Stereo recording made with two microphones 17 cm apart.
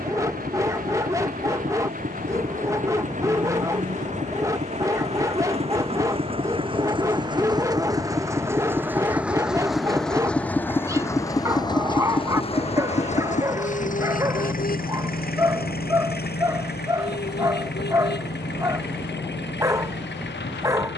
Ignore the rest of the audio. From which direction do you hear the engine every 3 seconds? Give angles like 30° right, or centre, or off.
50° right, 40° right, 20° right, 10° left, 40° left, 60° left, 80° left.